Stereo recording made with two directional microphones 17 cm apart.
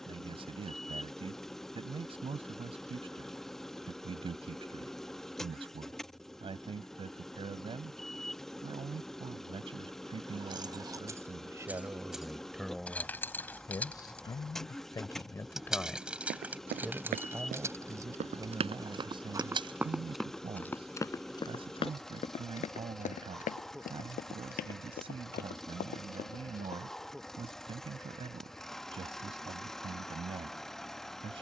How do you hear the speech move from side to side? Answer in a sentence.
In this clip you hear the speech move from right to left and back again.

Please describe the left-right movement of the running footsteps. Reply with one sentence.
You can hear the running footsteps travel towards the left.